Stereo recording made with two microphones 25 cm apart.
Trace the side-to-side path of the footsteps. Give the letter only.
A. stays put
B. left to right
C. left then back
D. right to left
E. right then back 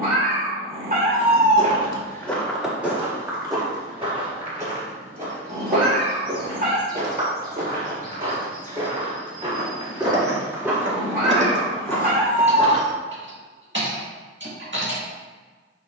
E.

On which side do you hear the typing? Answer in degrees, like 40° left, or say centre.
50° right.